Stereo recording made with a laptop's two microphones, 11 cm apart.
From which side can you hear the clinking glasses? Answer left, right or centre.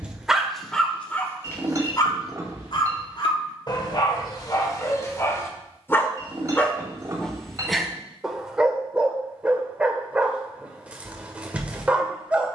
right.